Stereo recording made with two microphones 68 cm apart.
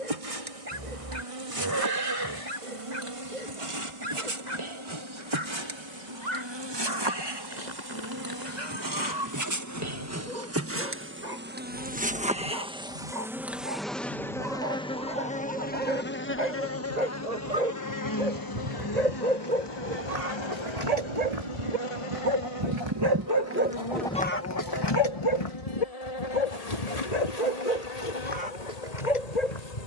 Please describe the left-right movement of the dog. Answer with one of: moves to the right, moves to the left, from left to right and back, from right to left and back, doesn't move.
moves to the left.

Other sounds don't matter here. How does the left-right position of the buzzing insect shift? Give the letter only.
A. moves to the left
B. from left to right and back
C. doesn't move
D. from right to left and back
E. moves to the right
A.